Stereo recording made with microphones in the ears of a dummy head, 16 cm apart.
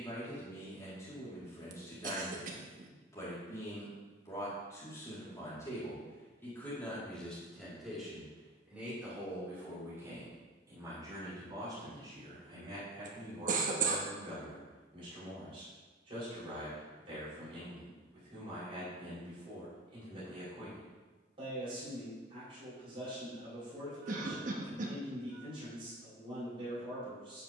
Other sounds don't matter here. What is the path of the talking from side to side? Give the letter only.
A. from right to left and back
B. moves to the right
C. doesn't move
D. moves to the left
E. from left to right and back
B.